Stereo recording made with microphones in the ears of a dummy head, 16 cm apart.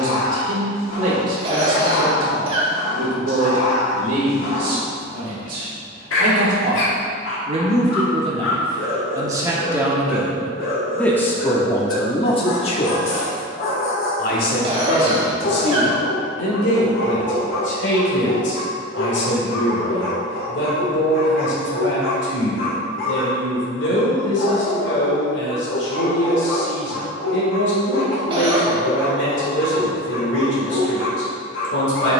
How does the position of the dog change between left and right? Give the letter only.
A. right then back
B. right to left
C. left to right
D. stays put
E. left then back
D.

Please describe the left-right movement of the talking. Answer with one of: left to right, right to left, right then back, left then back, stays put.
right to left.